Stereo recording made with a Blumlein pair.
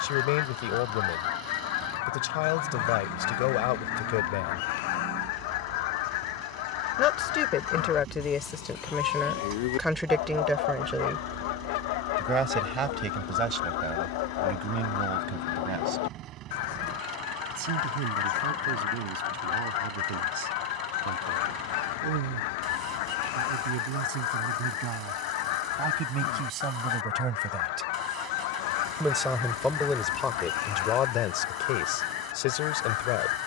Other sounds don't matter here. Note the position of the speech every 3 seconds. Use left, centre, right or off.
left, left, left, centre, right, right, right, right, right, centre, left.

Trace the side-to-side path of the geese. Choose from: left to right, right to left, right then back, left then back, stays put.
stays put.